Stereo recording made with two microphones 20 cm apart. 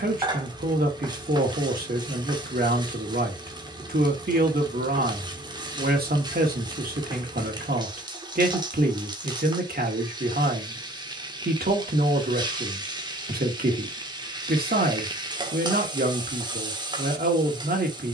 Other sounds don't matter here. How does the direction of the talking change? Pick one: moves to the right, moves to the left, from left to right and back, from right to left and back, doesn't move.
doesn't move.